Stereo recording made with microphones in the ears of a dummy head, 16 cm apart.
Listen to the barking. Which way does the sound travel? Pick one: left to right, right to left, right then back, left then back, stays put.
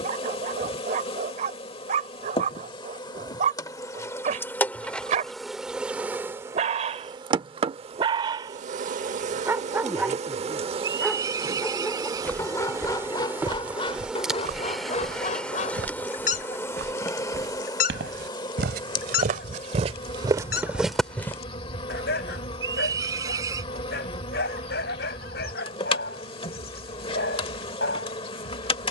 right to left.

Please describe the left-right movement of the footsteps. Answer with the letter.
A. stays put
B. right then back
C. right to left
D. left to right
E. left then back
B.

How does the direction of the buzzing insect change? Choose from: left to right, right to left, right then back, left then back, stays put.
right then back.